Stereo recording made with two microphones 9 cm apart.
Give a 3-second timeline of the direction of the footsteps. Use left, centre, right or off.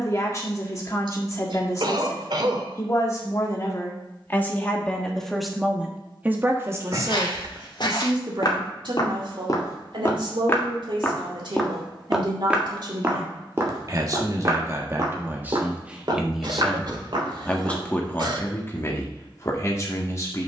off, off, left, left, right, right, off.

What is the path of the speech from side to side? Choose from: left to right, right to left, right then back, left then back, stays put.
right then back.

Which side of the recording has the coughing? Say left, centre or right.
right.